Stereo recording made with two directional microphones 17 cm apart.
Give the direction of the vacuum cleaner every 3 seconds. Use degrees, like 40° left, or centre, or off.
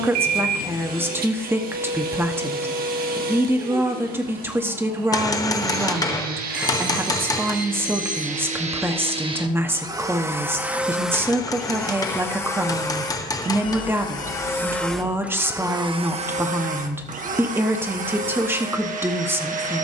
60° right, 60° right, 50° right, 10° right, 20° left, 40° right, 50° right.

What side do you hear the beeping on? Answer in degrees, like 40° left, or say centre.
50° right.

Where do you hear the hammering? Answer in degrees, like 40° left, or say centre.
20° left.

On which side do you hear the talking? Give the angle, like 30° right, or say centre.
10° right.